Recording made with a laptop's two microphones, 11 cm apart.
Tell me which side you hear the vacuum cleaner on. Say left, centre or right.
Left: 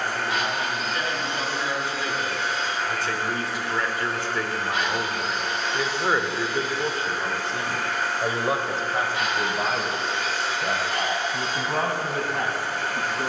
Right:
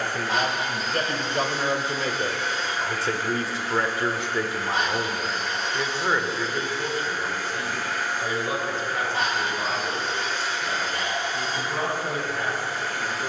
left.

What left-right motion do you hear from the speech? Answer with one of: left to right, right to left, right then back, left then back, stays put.
right to left.